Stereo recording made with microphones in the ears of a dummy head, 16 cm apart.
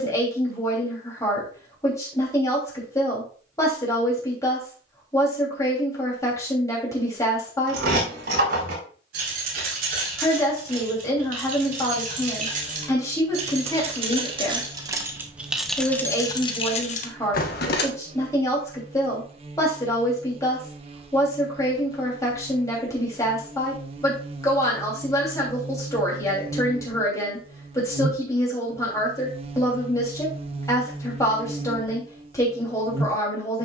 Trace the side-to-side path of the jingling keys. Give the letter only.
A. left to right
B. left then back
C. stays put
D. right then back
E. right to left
E.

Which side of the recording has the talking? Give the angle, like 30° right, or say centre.
20° left.